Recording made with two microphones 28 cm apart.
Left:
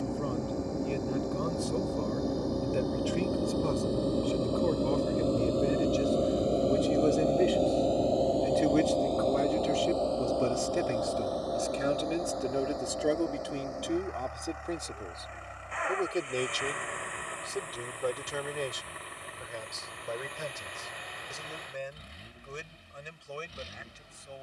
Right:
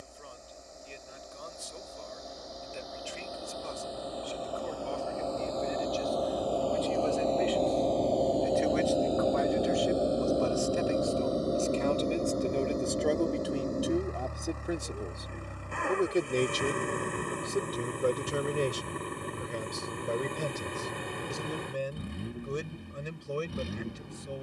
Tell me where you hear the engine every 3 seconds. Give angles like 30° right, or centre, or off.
70° left, 50° left, 10° left, 20° right, 40° right, 50° right, 60° right, 60° right.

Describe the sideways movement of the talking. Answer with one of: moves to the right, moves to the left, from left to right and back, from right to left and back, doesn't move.
moves to the right.